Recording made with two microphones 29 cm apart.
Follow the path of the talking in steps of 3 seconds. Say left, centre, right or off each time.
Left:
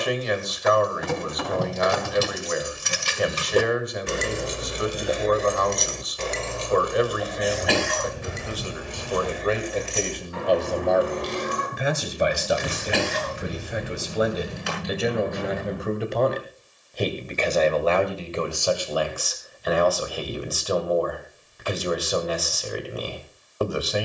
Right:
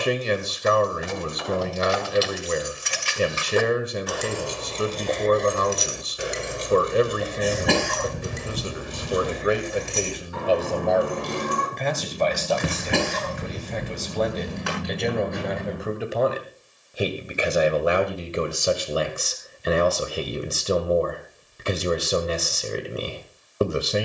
right, right, right, centre, centre, centre, right, right.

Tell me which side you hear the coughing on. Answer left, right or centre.
right.